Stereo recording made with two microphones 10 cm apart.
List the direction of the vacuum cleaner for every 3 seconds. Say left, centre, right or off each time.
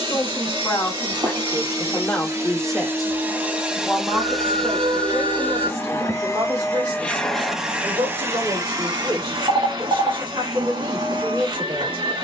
right, centre, centre, right.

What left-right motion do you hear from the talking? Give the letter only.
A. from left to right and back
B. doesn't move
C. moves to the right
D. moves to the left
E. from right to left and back
C.